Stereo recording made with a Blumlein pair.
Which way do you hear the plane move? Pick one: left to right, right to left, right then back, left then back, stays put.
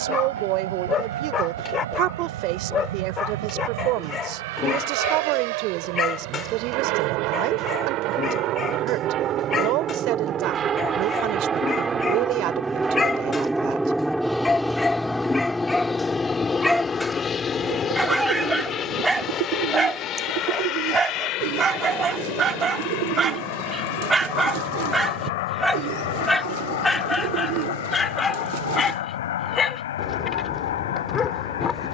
right to left.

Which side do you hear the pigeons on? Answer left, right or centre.
right.